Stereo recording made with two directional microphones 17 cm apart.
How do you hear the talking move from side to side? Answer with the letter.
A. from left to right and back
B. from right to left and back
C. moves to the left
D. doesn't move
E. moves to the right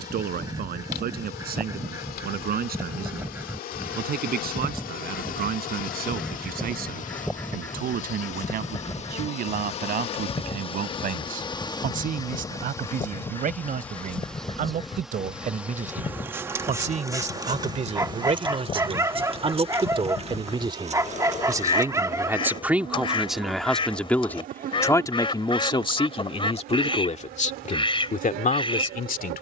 C.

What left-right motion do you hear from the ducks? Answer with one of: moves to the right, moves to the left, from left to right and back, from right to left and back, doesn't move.
moves to the left.